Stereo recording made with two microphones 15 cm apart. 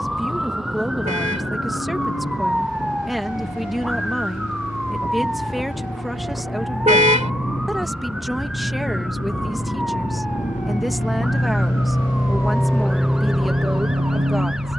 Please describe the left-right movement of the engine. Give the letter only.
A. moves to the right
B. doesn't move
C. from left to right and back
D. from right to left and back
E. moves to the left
A.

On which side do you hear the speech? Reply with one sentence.
In this clip you hear the speech in the centre.